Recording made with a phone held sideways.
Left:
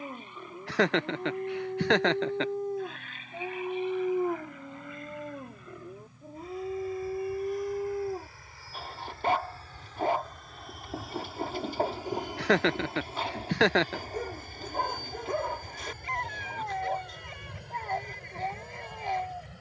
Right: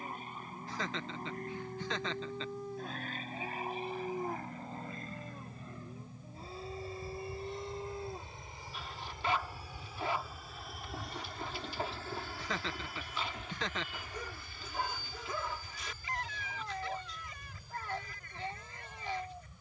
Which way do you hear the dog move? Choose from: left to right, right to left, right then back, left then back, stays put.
stays put.